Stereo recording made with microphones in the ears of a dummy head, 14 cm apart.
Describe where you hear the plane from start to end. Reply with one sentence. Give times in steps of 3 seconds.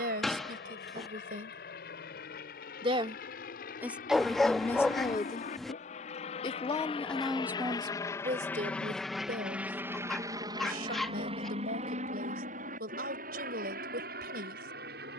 You can hear the plane on the left from 0 s and on the right from 9 s.